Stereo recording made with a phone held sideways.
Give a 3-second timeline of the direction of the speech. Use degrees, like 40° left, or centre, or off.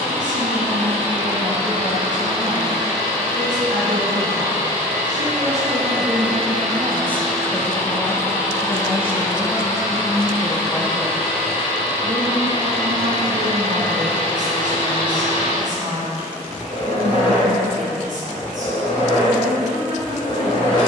60° right, 60° right, centre, 20° left, 50° right, 60° right, 60° right.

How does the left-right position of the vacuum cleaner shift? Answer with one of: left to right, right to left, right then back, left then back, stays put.
right to left.